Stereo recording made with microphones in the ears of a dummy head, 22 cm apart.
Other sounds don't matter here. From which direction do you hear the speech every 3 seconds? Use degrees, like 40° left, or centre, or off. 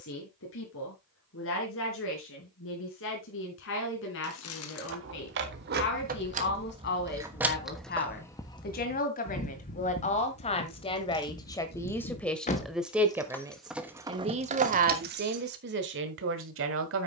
60° left, 50° left, 40° left, 30° left, 10° right, 50° right.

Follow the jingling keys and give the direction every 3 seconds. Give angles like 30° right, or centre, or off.
off, 50° right, 10° right, 40° left, centre, 50° right.